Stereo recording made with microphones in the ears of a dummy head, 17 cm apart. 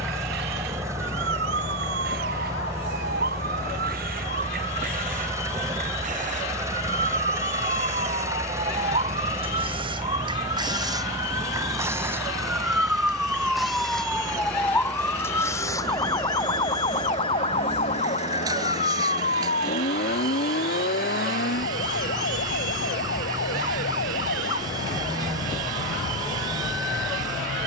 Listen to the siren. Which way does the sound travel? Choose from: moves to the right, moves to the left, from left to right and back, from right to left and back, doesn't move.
moves to the left.